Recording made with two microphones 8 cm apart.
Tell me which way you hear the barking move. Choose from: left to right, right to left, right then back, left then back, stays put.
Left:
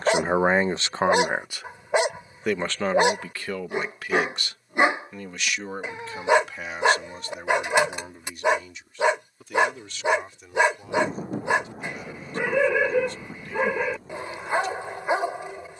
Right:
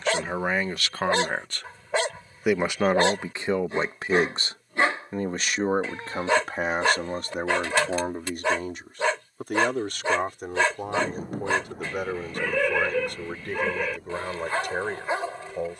stays put.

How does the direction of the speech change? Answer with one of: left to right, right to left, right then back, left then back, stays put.
left to right.